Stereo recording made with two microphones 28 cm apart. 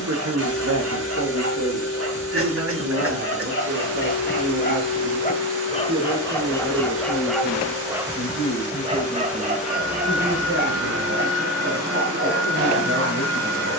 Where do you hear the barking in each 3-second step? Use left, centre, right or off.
left, left, centre, right, right.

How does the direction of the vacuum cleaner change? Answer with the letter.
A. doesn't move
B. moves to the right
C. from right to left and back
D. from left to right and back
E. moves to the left
A.